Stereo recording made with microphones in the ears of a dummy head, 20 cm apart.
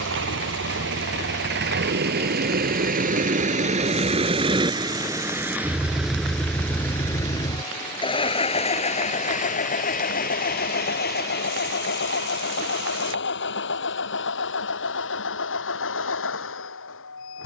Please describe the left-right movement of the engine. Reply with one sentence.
In this clip you hear the engine travel towards the left.